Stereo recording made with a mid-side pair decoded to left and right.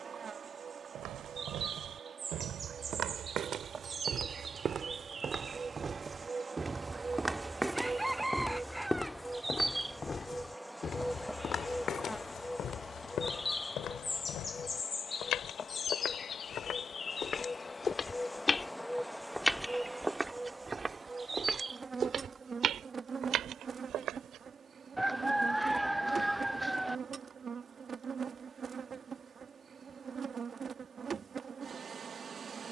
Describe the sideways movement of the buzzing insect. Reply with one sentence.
In this clip you hear the buzzing insect move from right to left and back again.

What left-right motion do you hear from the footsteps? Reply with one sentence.
In this clip you hear the footsteps go left and come back.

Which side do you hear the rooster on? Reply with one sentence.
You can hear the rooster in the centre.